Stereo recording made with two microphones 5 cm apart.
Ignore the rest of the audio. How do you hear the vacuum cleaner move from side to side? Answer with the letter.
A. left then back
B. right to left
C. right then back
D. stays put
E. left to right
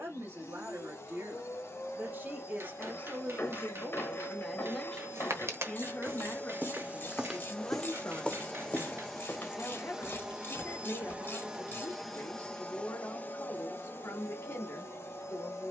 C.